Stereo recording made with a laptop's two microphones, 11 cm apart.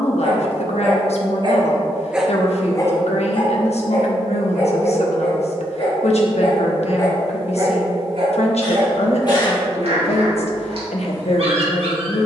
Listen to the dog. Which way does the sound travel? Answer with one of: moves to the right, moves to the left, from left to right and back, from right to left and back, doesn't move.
from right to left and back.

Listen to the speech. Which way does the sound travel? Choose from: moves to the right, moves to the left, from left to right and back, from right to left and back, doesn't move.
doesn't move.